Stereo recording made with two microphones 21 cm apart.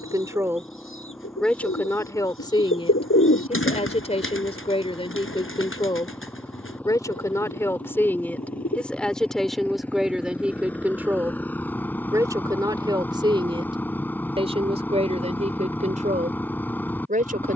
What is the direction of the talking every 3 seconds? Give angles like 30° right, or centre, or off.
10° left, 30° left, 10° left, centre, 20° right, 40° right.